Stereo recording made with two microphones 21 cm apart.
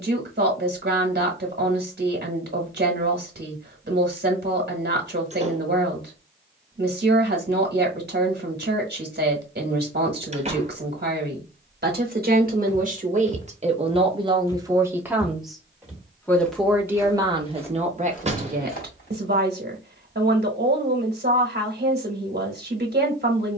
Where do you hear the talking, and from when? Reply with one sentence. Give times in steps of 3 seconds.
In this clip you hear the talking on the right from 0 s, in the centre from 15 s and on the right from 18 s.